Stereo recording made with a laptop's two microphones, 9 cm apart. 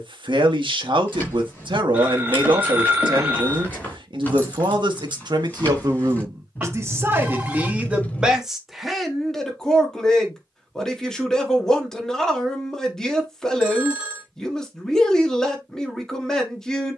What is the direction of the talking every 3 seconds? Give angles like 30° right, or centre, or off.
70° right, 60° right, 20° right, centre, 10° left, 10° left.